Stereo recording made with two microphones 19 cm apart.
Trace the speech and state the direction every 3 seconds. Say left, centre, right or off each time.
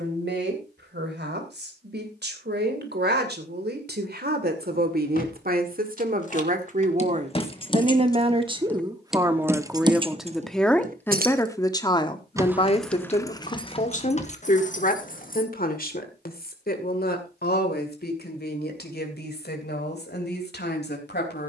right, right, right, centre, left, left, left.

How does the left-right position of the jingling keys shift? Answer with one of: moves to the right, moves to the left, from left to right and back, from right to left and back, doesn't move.
from left to right and back.